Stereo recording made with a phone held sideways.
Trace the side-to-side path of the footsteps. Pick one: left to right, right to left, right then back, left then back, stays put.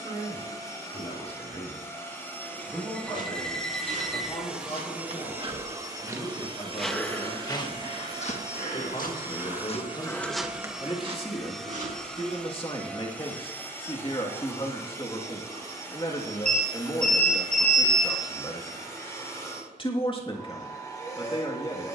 left then back.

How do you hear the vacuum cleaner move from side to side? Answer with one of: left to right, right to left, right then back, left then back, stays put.
right then back.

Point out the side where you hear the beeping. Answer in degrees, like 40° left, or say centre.
10° left.